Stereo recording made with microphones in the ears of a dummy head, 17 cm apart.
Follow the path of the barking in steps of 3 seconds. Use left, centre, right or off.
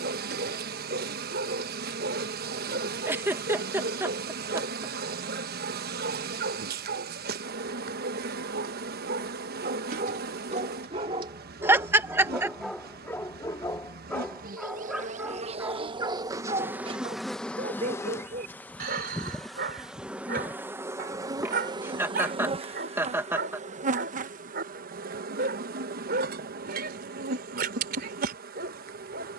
right, right, right, right, centre, right, right, right, right, right.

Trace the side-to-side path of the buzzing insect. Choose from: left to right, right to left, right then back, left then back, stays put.
left then back.